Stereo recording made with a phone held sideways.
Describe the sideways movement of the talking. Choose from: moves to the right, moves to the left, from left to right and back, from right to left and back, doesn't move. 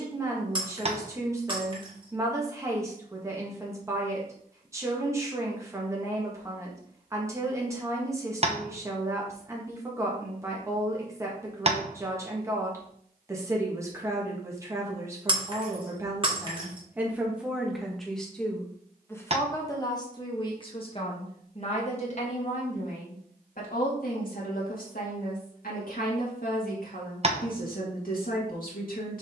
moves to the left.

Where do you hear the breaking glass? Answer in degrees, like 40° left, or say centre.
30° right.